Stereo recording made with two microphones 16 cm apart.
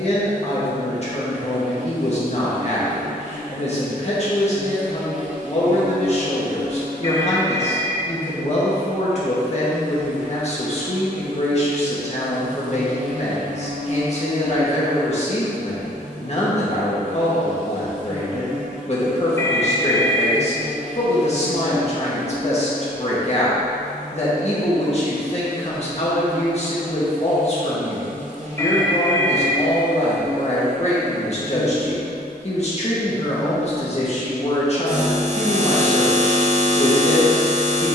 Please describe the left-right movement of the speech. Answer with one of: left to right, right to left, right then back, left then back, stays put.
stays put.